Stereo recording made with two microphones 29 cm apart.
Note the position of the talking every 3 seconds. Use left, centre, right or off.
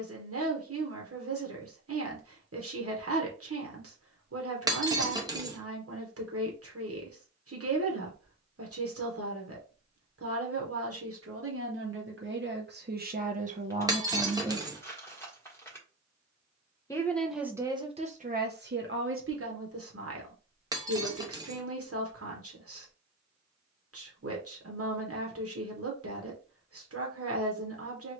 right, right, right, right, right, centre, right, right, right, right.